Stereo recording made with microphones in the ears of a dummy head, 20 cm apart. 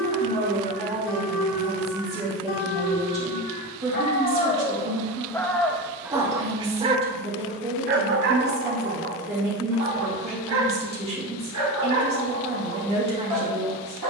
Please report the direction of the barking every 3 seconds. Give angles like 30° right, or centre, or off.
60° left, 30° left, 30° right, 60° right, 70° right.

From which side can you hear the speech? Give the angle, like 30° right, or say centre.
30° right.